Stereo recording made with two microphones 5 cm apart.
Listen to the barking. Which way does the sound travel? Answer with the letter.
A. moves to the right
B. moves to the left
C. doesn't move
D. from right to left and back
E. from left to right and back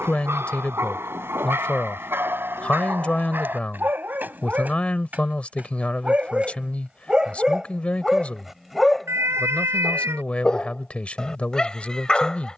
B.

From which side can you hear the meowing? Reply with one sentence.
In this clip you hear the meowing on the right.